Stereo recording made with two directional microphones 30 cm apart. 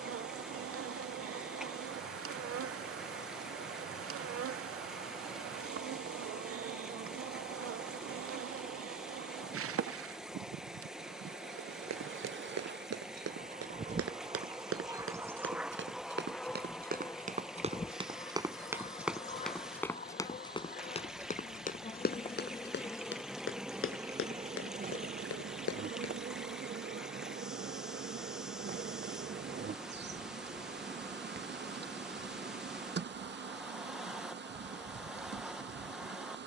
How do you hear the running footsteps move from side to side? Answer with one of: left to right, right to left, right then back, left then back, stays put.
right to left.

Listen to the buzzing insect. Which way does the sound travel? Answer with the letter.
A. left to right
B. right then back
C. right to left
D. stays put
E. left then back
E.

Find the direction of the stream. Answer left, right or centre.
centre.